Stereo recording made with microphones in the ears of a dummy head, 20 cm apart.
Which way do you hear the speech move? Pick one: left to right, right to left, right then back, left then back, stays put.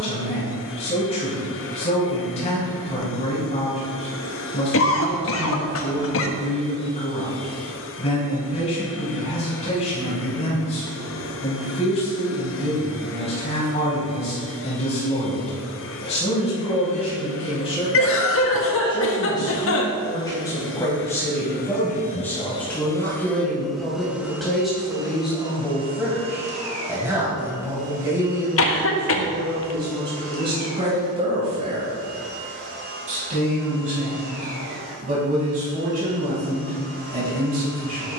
left to right.